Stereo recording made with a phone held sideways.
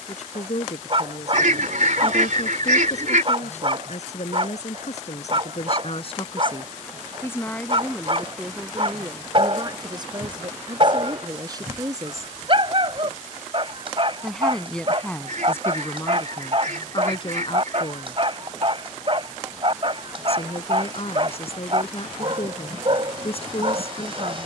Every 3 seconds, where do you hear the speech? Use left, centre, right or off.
left, left, centre, right, centre, left, left, left.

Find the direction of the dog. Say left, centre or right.
right.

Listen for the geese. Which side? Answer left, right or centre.
right.